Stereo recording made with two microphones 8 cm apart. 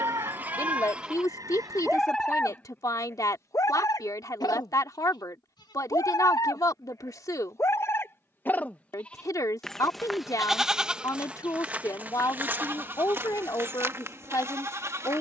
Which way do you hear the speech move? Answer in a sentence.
In this clip you hear the speech stay put.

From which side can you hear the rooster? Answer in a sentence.
You can hear the rooster on the right.